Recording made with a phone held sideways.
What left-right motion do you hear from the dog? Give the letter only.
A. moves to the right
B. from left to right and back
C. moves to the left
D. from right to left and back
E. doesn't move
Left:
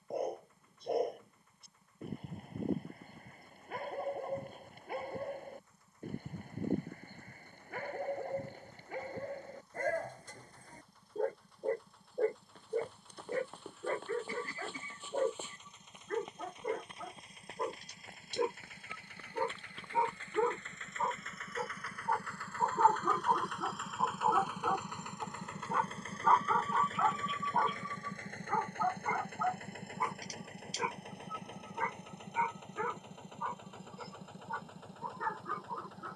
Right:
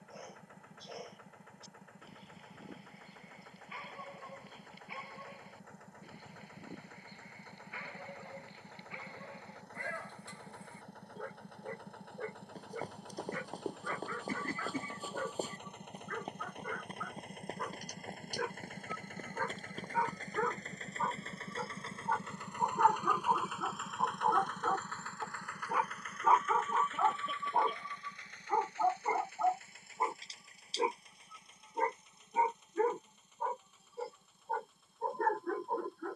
A.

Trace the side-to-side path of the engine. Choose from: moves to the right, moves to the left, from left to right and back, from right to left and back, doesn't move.
moves to the left.